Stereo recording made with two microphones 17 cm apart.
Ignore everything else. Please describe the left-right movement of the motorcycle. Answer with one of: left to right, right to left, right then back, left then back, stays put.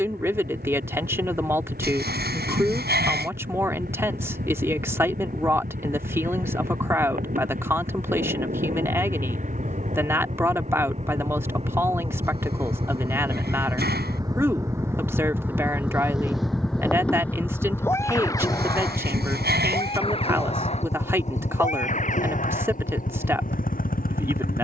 right to left.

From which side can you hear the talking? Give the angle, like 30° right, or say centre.
10° right.